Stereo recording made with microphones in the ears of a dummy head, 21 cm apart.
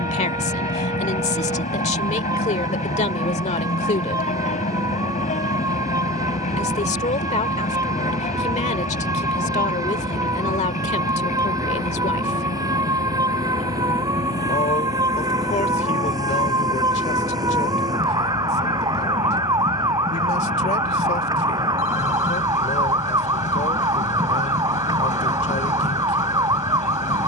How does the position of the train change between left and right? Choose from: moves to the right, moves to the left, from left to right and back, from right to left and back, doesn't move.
doesn't move.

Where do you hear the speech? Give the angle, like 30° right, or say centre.
30° left.